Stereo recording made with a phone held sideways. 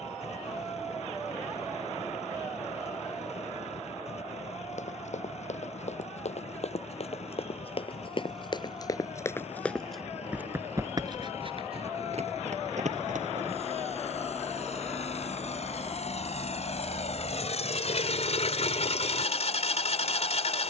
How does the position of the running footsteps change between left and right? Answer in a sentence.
In this clip you hear the running footsteps go from the left side to the right.